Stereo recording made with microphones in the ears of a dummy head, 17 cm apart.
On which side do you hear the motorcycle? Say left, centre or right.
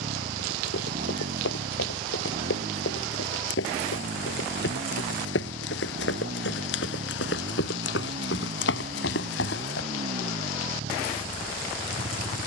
right.